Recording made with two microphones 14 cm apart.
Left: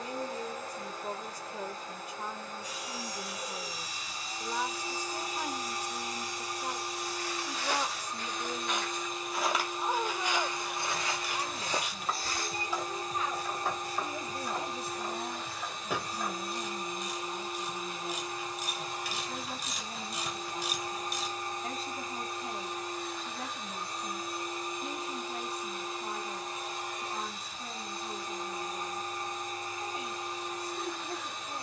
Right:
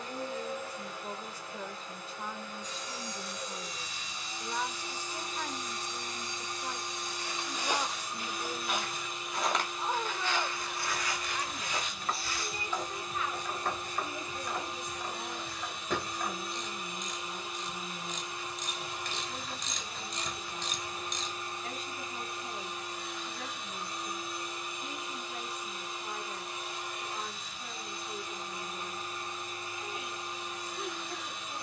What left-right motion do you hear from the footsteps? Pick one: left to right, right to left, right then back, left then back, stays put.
right to left.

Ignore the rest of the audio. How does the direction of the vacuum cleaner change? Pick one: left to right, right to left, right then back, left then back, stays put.
stays put.